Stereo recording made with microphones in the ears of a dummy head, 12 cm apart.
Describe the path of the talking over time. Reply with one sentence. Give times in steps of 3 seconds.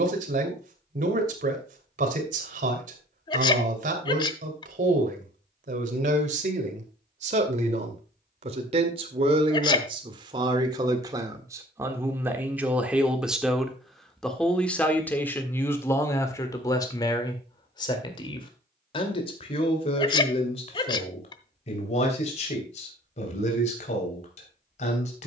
In this clip you hear the talking on the right from 0 s, in the centre from 12 s and on the left from 15 s.